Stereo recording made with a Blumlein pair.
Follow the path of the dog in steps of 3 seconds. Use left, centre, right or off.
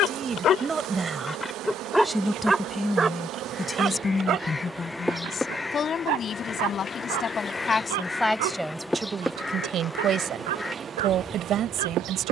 centre, right, right, right.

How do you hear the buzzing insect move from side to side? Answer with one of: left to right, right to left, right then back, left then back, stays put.
left then back.